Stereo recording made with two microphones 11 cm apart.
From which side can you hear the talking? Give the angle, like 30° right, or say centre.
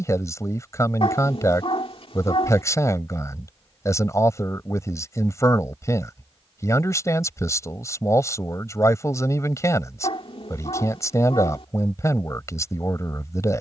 30° left.